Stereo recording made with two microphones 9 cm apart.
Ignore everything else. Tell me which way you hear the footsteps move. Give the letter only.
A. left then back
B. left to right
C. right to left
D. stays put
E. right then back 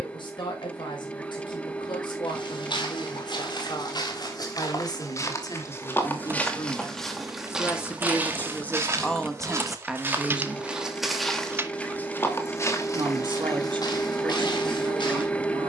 E.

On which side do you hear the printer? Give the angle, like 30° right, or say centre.
10° left.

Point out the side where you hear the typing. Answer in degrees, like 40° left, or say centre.
20° right.